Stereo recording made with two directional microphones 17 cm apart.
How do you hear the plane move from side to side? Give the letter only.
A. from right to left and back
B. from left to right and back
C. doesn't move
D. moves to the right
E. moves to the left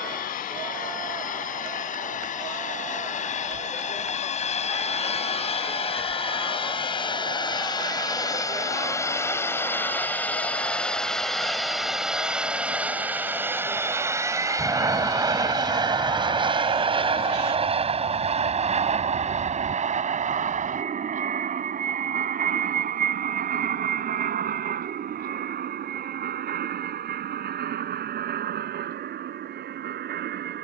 D.